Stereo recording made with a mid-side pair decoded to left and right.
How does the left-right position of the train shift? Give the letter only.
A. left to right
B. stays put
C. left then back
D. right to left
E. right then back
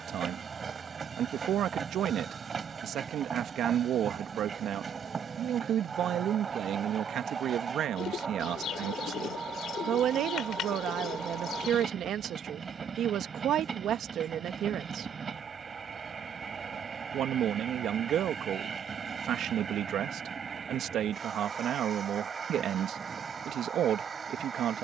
B.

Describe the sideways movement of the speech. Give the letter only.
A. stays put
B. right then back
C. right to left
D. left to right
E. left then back
A.